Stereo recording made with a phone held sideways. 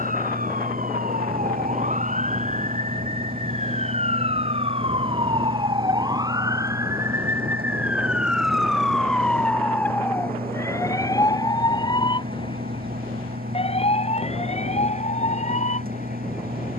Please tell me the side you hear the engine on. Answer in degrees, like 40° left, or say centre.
70° right.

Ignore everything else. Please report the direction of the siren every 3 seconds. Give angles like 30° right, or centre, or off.
60° right, 40° right, 10° right, 20° left, 40° left, 50° left.